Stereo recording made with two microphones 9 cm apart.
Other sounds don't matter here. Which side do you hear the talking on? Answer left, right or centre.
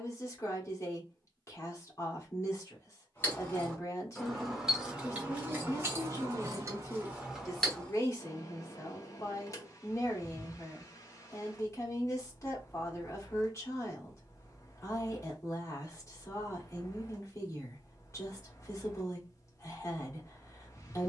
left.